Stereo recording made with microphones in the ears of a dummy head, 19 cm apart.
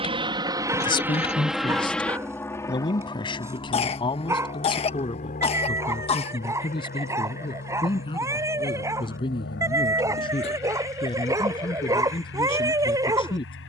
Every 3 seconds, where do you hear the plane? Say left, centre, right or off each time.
centre, left, left, left, left.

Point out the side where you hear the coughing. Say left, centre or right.
left.